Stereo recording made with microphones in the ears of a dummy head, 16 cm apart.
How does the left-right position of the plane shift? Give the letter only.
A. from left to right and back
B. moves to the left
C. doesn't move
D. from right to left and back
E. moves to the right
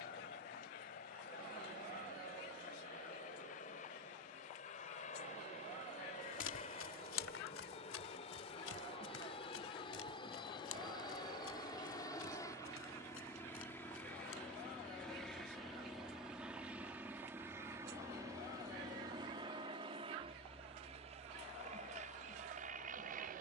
E.